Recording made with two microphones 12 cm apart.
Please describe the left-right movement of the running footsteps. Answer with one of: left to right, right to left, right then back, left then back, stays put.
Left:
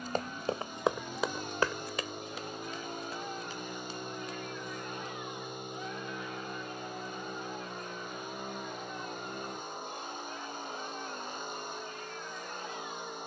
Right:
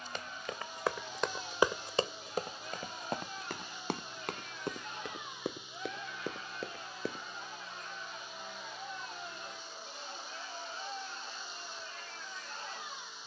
left to right.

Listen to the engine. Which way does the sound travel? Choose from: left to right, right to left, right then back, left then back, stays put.
stays put.